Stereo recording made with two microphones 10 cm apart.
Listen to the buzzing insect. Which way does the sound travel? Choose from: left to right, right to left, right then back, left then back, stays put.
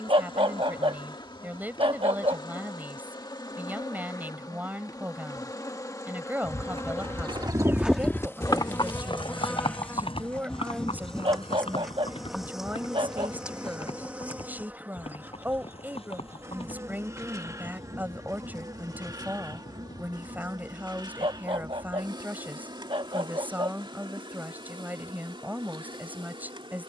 left to right.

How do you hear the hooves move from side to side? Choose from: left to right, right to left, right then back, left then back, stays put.
right to left.